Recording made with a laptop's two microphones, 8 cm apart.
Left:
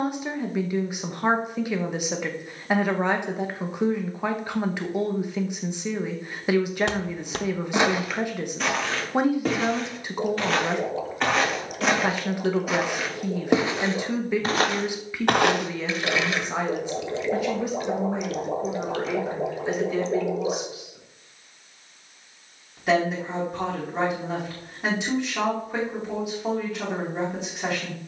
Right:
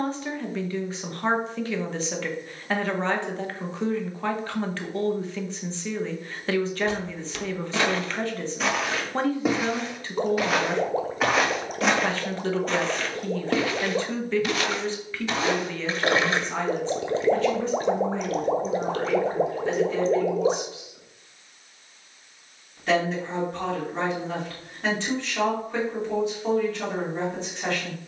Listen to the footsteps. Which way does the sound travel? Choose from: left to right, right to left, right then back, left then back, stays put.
right then back.